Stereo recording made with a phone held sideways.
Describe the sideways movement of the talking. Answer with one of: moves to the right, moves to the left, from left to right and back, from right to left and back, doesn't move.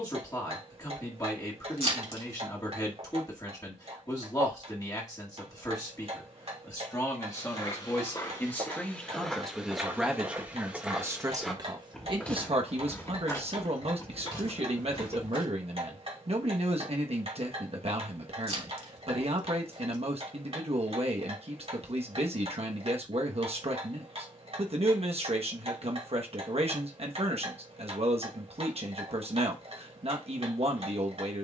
moves to the right.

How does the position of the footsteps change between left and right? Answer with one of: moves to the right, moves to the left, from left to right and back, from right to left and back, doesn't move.
from left to right and back.